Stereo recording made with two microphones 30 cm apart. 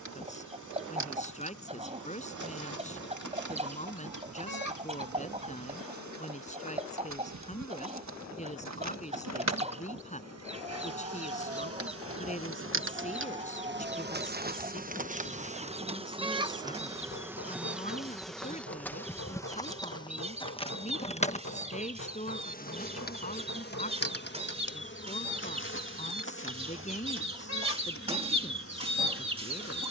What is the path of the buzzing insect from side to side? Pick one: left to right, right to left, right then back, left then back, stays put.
right to left.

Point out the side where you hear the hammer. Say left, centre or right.
left.